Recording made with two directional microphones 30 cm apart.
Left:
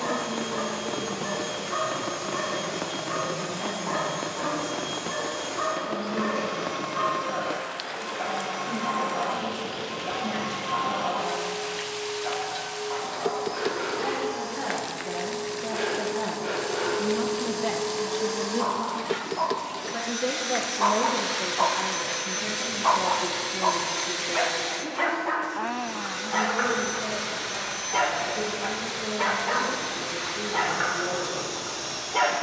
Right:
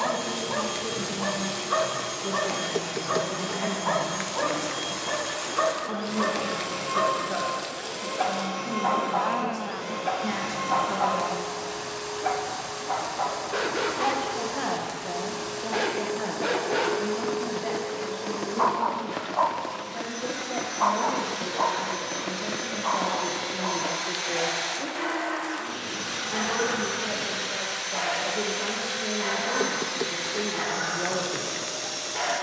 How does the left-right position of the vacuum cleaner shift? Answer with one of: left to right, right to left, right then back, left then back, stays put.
left then back.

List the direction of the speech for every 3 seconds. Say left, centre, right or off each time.
right, right, right, right, right, centre, left, centre, right, right, right.